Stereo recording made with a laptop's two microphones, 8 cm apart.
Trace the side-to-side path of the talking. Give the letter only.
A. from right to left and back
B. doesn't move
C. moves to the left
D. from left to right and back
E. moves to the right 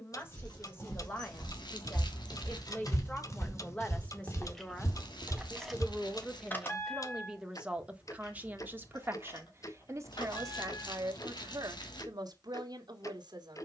E.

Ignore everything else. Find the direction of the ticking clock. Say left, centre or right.
left.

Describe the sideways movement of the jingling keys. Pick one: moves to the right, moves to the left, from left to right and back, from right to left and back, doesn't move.
from left to right and back.